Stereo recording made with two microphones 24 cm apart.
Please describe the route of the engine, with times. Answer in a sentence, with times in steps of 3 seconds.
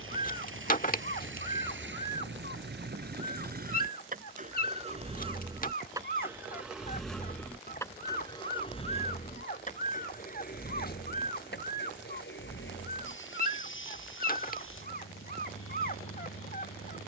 In this clip you hear the engine on the right from 0 s, in the centre from 6 s and on the left from 9 s.